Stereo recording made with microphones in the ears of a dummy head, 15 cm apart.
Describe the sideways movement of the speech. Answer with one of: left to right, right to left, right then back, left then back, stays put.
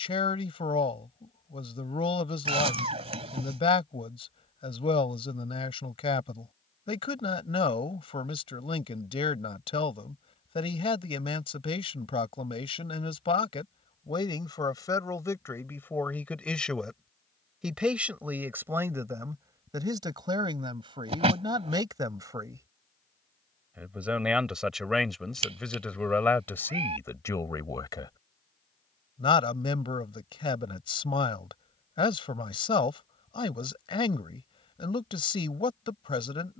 right then back.